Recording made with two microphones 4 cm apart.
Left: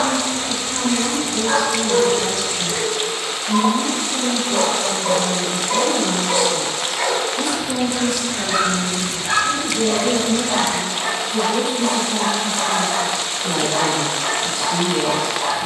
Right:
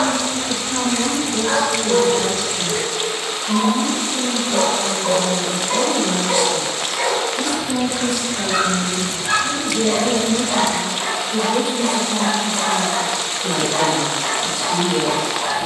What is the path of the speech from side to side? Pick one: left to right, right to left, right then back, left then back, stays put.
left then back.